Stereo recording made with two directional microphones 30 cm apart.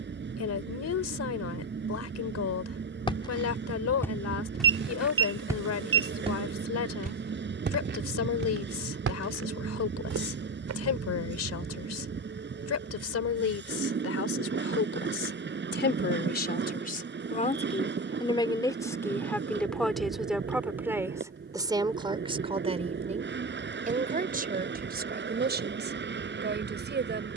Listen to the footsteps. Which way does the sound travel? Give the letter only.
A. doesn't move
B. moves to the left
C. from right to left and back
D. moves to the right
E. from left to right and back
D.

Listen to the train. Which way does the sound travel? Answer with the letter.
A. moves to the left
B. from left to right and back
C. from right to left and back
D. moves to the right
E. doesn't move
E.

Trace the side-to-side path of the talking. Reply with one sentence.
In this clip you hear the talking move to the right.